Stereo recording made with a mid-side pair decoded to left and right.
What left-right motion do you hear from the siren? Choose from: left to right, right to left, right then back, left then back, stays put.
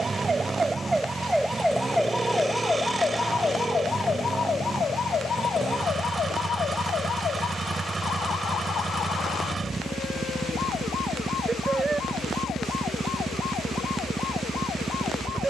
right to left.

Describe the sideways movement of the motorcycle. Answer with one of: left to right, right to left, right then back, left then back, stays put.
stays put.